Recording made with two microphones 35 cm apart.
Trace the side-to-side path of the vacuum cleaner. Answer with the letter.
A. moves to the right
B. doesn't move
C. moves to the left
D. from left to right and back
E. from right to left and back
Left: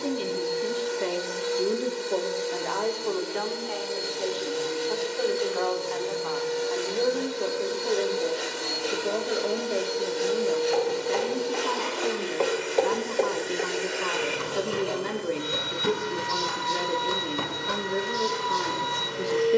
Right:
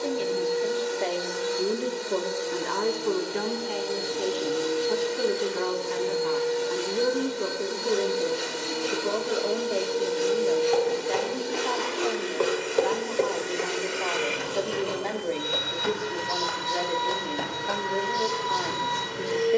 C.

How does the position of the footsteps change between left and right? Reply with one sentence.
You can hear the footsteps move from right to left and back again.